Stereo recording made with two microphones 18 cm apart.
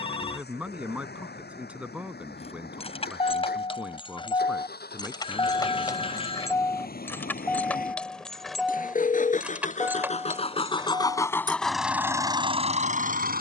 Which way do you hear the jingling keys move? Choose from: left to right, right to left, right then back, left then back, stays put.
left to right.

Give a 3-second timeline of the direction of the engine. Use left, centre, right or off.
left, left, left, left, right.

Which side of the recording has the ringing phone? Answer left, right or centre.
left.